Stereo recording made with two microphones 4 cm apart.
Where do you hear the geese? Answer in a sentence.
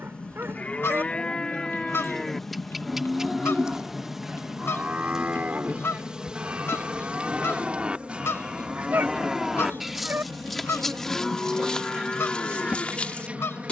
In this clip you hear the geese on the left.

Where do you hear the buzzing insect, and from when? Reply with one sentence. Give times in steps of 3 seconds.
In this clip you hear the buzzing insect in the centre from 0 s and on the right from 6 s.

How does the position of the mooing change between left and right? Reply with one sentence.
In this clip you hear the mooing go right and come back.